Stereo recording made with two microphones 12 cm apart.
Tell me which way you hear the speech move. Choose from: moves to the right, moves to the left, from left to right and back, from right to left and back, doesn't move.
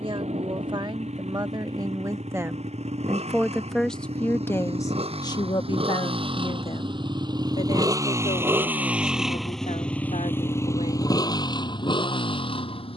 moves to the left.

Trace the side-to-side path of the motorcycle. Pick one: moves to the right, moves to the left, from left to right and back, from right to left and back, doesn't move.
moves to the left.